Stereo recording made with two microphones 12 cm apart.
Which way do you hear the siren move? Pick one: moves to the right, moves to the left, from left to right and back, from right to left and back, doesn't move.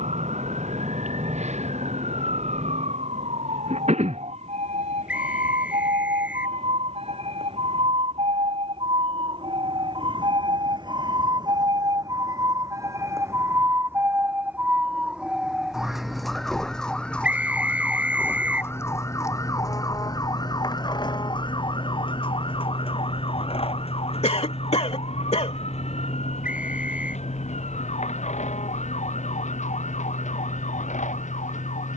moves to the left.